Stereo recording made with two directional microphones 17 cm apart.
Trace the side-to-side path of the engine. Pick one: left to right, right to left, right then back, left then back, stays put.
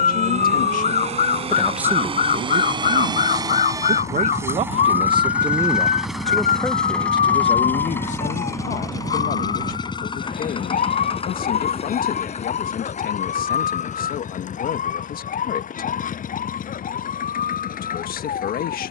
right to left.